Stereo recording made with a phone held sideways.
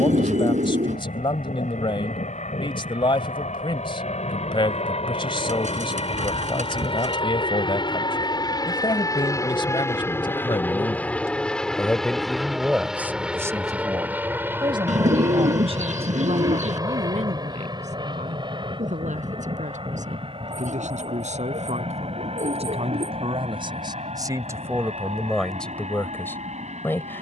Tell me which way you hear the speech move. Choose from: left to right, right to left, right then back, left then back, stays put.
right then back.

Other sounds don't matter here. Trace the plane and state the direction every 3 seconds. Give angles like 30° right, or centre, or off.
70° left, 50° left, 40° left, 10° left, 10° right, 20° right, 30° right, 40° right, 50° right.